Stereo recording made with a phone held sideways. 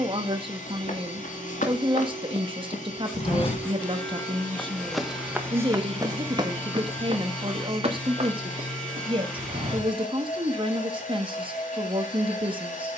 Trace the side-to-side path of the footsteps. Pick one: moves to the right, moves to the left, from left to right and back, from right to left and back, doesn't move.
moves to the right.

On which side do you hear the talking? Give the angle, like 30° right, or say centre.
40° right.